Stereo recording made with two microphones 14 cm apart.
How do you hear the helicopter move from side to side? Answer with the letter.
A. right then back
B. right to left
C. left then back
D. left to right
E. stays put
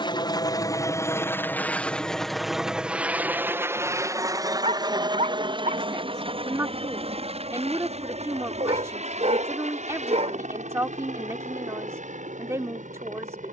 D.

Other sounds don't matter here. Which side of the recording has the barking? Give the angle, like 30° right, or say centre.
50° right.